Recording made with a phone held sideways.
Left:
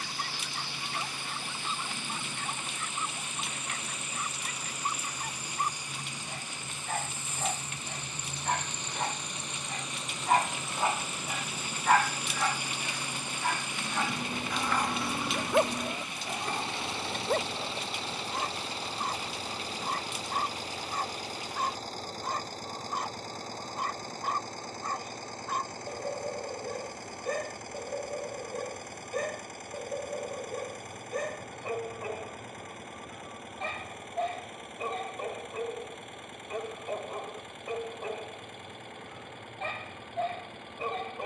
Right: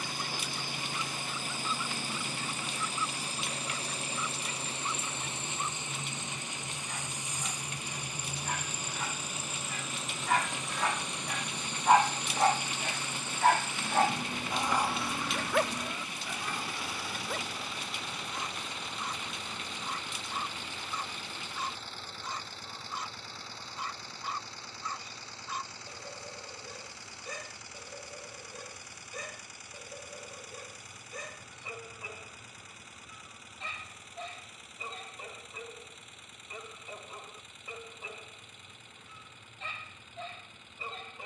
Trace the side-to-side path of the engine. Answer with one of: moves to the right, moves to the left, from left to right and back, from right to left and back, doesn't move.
moves to the left.